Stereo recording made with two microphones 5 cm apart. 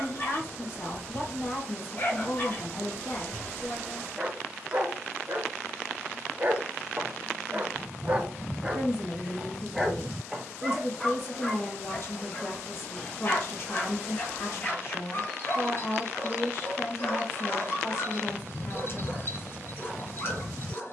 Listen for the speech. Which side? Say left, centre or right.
left.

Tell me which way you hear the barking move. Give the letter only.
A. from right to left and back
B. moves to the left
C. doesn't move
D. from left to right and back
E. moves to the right
D.